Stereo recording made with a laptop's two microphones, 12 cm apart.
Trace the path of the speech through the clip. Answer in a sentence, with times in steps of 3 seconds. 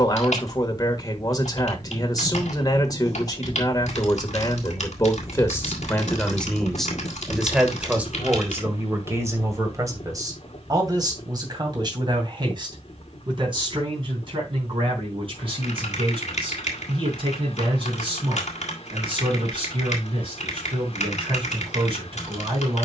You can hear the speech on the left from 0 s, in the centre from 6 s and on the right from 9 s.